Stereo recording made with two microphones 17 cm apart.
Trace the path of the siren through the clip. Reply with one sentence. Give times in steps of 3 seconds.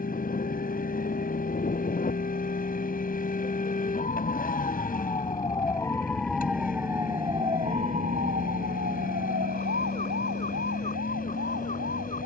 You can hear the siren on the left from 0 s and on the right from 6 s.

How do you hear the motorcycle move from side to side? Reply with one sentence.
You can hear the motorcycle stay in one place.